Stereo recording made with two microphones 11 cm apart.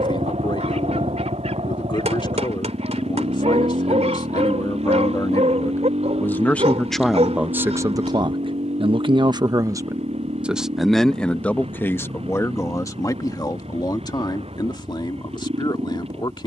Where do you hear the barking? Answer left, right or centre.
right.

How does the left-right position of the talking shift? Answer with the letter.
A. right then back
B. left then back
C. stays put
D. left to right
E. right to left
A.